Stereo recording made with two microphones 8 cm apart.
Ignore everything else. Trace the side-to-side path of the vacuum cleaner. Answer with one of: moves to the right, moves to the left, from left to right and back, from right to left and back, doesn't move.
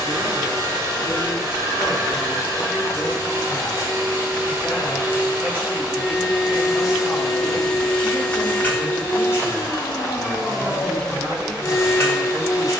moves to the left.